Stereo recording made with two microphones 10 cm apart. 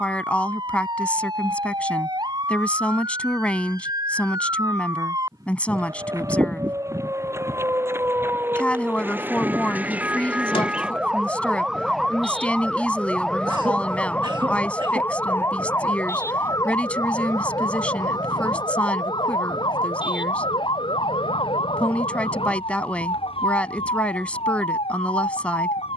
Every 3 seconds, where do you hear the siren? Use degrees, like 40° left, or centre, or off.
50° right, 40° right, 30° right, 10° right, 10° left, 30° left, 40° left, 60° left, 60° left.